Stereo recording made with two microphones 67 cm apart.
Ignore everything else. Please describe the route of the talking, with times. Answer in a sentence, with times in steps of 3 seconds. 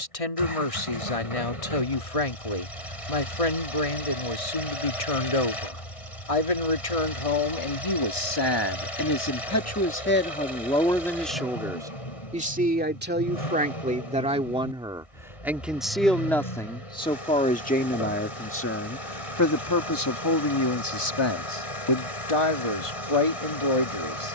You can hear the talking on the left from 0 s, in the centre from 9 s and on the left from 18 s.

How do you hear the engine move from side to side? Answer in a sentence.
In this clip you hear the engine stay put.